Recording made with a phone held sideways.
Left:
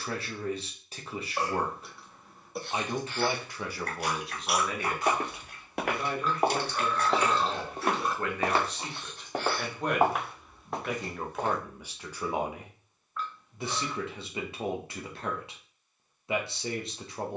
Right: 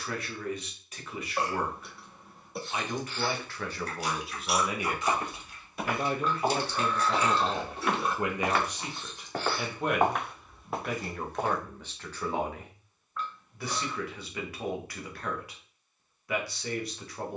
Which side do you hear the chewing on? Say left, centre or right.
left.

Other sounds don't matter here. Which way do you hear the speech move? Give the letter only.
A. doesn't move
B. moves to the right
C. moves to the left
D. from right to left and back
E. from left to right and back
E.